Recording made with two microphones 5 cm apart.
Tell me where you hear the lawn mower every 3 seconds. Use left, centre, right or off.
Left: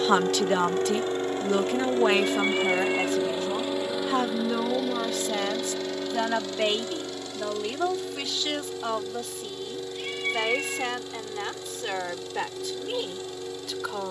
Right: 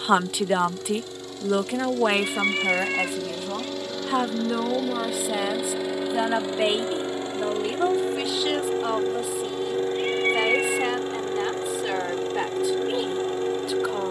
left, centre, right, right, right.